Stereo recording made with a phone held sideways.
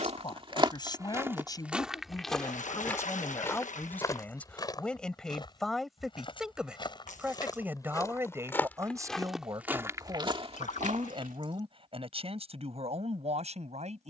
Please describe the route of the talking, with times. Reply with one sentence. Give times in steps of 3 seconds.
In this clip you hear the talking on the left from 0 s, in the centre from 3 s and on the right from 9 s.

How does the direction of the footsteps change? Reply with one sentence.
You can hear the footsteps go left and come back.